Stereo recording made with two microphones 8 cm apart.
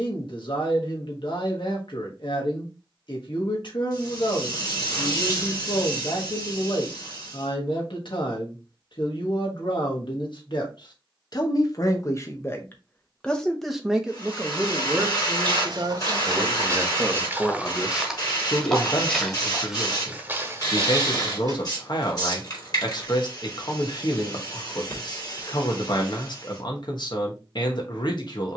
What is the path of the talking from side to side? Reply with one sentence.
In this clip you hear the talking move from left to right and back again.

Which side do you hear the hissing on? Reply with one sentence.
You can hear the hissing on the left.